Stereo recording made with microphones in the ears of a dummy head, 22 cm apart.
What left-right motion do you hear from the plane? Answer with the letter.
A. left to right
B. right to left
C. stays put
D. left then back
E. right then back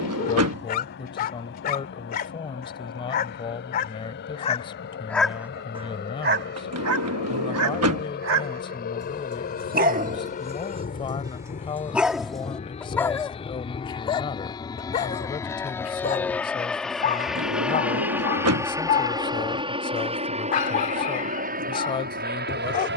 A.